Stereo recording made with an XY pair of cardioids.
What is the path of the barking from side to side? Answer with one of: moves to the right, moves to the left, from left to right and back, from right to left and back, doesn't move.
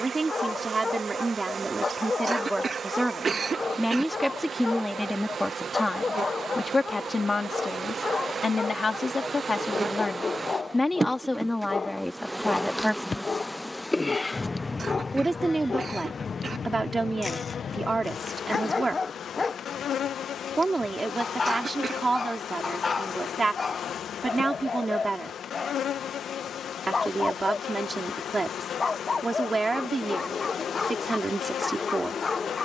doesn't move.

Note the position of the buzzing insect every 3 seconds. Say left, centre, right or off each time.
right, right, right, right, centre, left, left, left, left, left, left.